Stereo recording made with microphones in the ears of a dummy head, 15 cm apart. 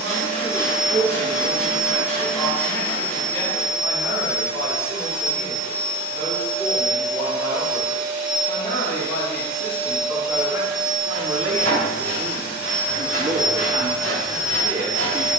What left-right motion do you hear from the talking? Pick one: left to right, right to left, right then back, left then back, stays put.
left then back.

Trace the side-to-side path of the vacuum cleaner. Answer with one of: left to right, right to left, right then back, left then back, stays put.
stays put.